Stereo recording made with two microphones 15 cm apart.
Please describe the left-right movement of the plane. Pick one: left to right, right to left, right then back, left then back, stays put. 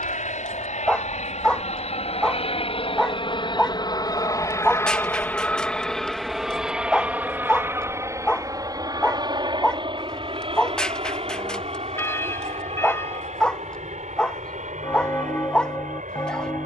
left to right.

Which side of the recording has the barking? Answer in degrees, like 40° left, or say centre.
10° left.